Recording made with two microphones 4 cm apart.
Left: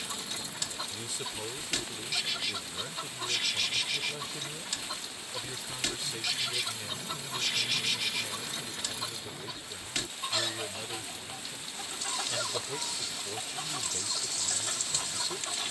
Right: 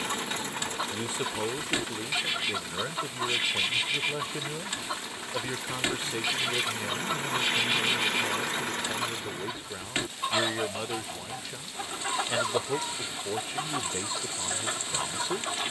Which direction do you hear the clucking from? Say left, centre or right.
right.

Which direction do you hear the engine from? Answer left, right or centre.
right.